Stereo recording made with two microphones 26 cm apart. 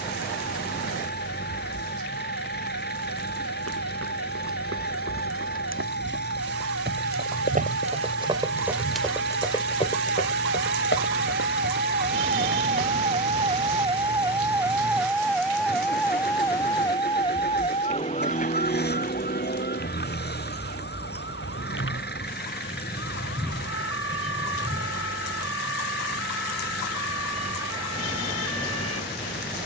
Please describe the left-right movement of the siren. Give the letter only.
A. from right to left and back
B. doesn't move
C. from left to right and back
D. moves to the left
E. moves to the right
D.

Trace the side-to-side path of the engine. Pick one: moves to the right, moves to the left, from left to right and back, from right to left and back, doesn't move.
doesn't move.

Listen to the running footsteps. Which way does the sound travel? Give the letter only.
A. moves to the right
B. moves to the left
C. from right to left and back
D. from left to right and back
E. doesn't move
B.